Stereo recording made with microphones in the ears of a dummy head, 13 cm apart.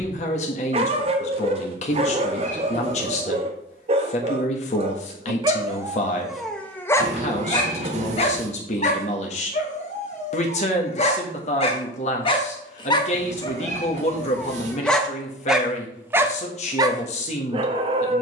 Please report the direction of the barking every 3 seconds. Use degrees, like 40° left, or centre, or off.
40° right, 40° right, 20° left, 50° left, 20° left, 20° right.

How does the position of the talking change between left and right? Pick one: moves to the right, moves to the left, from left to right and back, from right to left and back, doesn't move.
doesn't move.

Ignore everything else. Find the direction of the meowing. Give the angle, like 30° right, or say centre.
50° right.